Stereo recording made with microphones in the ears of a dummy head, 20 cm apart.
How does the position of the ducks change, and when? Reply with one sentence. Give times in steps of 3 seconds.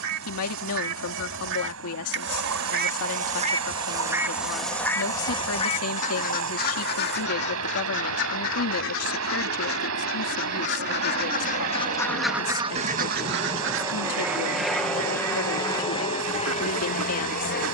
In this clip you hear the ducks on the right from 0 s, in the centre from 3 s, on the left from 6 s and on the right from 12 s.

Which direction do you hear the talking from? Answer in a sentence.
You can hear the talking on the left.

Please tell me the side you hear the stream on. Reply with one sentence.
In this clip you hear the stream on the right.